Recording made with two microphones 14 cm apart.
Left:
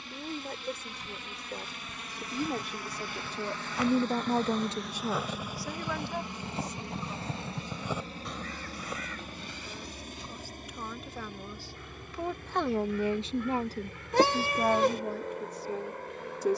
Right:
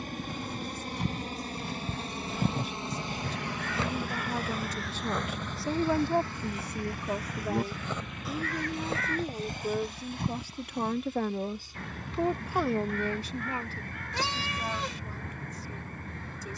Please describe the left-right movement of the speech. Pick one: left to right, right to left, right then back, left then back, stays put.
right then back.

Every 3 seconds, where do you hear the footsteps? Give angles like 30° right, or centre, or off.
60° right, 10° right, 10° left, 60° right, off, off.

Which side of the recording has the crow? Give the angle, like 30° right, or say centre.
60° right.